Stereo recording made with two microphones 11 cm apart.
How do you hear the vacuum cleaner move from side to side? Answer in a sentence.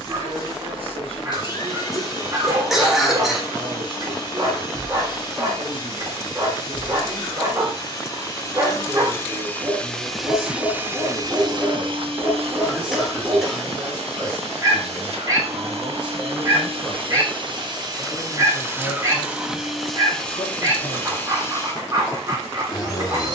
You can hear the vacuum cleaner move from left to right and back again.